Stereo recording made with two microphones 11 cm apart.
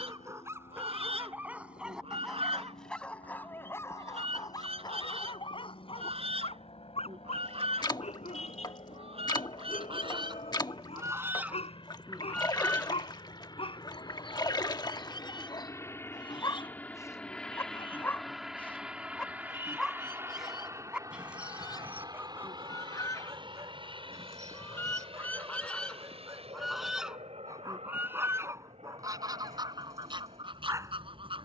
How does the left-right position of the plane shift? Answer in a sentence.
You can hear the plane move from left to right.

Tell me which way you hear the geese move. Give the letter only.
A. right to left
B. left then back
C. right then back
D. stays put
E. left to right
B.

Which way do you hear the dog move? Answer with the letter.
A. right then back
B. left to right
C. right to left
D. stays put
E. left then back
E.